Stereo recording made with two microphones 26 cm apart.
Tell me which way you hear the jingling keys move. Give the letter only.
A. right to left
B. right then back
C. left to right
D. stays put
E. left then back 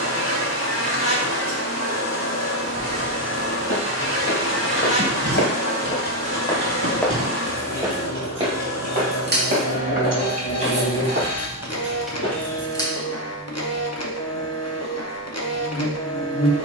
B.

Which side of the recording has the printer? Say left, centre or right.
left.